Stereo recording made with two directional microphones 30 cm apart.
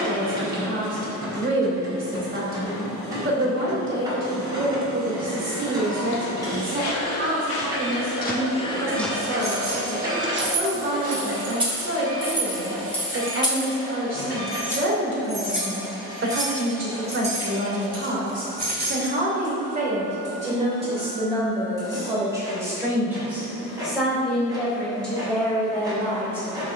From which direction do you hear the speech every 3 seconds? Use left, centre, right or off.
right, right, right, right, right, right, right, centre, centre.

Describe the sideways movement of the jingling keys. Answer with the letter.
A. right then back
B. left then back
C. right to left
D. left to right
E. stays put
B.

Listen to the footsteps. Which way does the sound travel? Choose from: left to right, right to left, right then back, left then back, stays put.
left to right.